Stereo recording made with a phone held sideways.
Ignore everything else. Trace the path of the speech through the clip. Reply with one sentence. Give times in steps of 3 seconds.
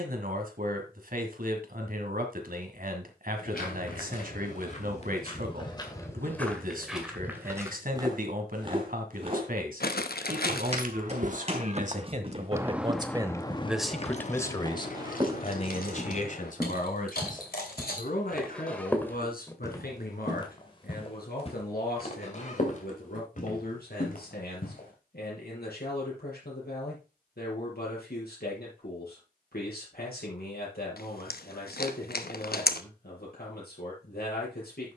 In this clip you hear the speech on the right from 0 s, in the centre from 12 s and on the left from 15 s.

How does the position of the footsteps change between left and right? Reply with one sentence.
In this clip you hear the footsteps move from left to right and back again.